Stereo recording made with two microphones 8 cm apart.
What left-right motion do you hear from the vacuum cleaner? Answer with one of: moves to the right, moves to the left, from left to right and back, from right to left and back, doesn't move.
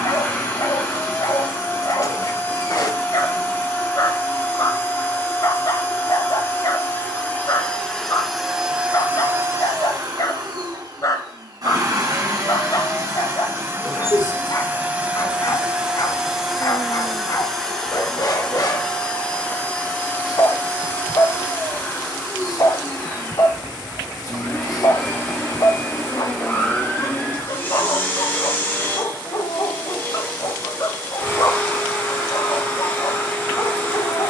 from left to right and back.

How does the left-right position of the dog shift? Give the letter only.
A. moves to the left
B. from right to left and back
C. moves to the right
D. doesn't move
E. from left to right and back
D.